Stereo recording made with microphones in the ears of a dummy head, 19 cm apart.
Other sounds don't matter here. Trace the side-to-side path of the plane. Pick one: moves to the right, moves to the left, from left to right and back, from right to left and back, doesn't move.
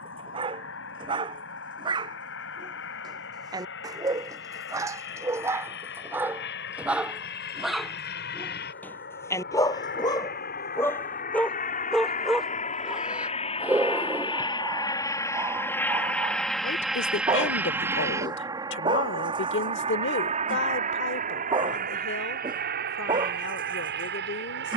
moves to the right.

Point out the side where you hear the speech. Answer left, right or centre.
left.